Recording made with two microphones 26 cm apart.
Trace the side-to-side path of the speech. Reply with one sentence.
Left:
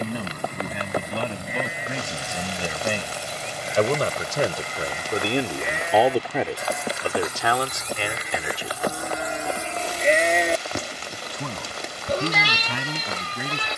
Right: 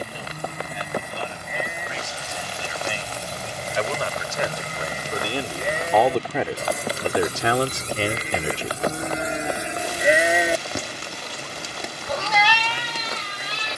You can hear the speech go right and come back.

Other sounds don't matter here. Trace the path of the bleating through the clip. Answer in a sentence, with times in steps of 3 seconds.
You can hear the bleating on the right from 0 s, in the centre from 9 s and on the left from 12 s.